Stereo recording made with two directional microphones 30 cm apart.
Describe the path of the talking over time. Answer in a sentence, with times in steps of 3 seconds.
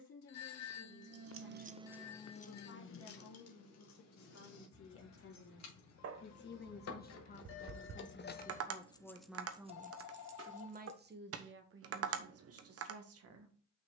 In this clip you hear the talking on the left from 0 s and on the right from 9 s.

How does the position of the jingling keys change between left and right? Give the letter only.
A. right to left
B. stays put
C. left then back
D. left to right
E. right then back
C.